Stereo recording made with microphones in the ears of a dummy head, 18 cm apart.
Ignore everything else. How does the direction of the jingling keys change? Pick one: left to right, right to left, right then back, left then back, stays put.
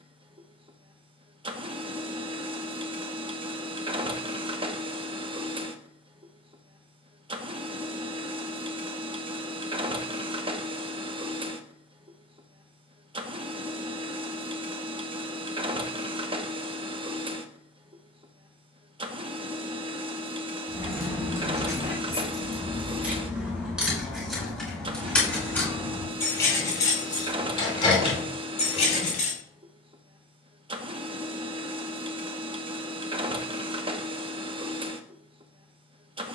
right to left.